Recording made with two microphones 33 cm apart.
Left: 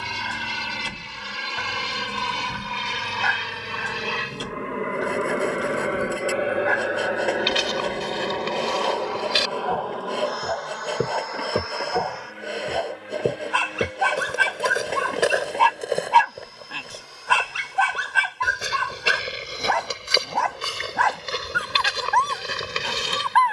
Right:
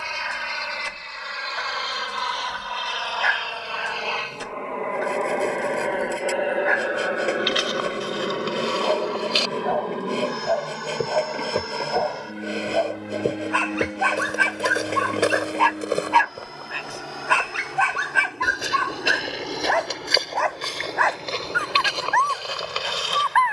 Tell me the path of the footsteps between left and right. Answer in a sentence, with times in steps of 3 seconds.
In this clip you hear the footsteps not at all from 0 s, on the left from 6 s, in the centre from 12 s and on the left from 21 s.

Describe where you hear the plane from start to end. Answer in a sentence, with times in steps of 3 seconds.
In this clip you hear the plane on the left from 0 s, in the centre from 6 s and on the right from 9 s.